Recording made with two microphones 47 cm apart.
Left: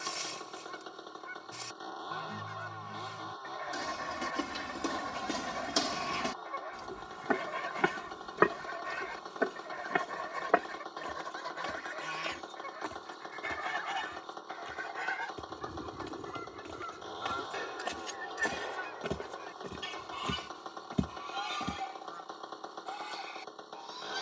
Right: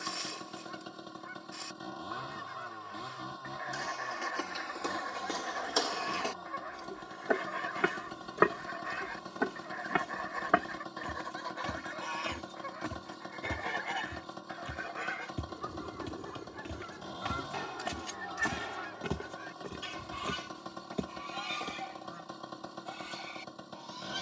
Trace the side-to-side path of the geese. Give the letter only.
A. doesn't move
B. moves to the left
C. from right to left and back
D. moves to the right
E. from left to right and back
D.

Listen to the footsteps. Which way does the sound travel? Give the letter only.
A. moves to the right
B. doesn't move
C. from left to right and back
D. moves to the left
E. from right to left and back
C.